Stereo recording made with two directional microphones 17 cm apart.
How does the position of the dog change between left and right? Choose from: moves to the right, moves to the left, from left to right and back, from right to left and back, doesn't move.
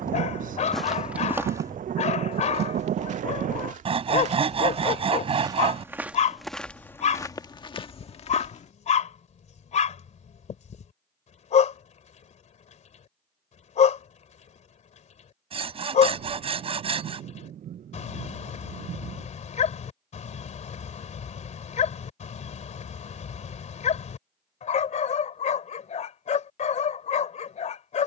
doesn't move.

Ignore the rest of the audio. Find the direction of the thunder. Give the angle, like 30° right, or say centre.
50° right.